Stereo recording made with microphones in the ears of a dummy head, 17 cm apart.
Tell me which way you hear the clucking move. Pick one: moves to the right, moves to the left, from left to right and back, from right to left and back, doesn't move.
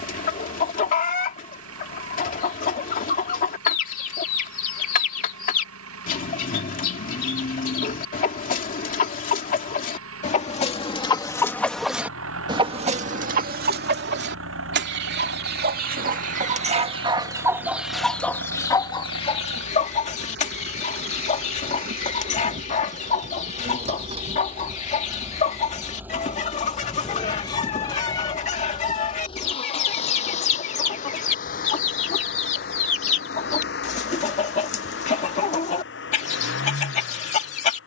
from left to right and back.